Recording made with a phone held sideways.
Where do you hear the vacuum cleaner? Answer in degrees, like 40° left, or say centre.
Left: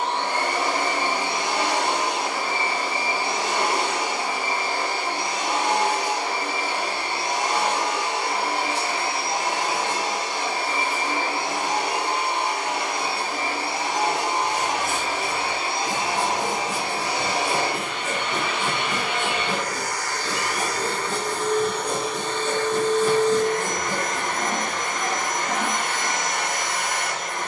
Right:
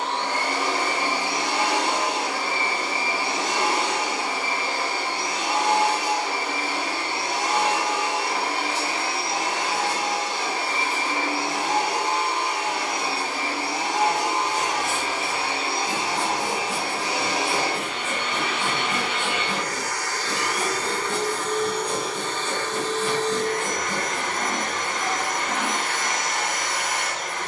30° left.